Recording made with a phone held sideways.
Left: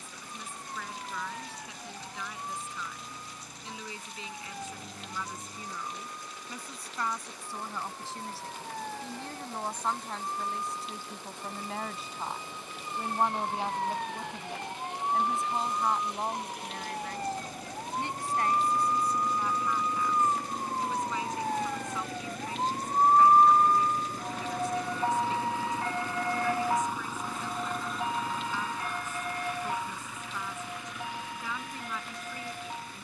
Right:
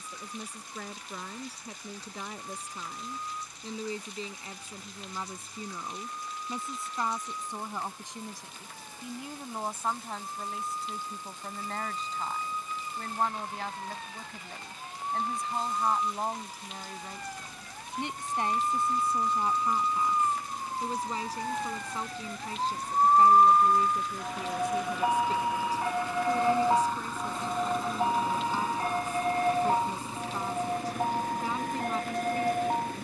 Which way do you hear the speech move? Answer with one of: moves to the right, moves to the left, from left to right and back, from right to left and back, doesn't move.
from right to left and back.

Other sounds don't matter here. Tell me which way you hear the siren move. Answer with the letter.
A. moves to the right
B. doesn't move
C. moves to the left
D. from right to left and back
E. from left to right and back
A.